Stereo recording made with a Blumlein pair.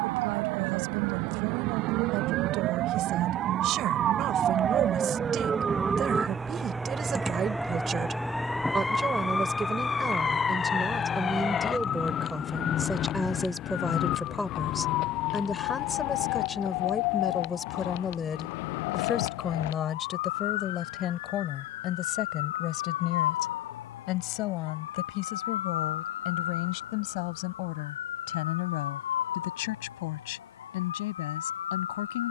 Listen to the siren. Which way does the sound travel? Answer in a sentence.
In this clip you hear the siren move from right to left.